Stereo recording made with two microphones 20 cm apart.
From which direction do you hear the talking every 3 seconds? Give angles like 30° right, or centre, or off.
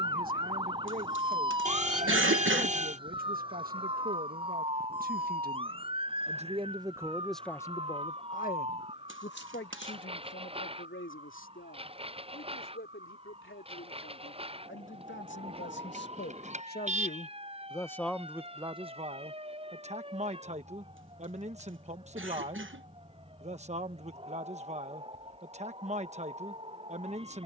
50° right, 50° right, 10° left, 70° left, 80° left, 50° left, 30° right, 30° right, 30° right.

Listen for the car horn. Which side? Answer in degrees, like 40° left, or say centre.
40° right.